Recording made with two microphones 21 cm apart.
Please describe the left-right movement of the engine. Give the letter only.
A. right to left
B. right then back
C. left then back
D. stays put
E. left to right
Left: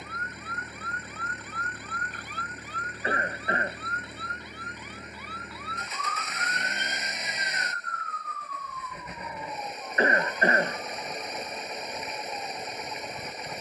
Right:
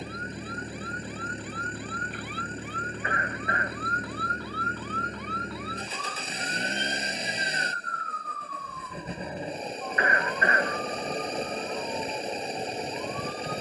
D.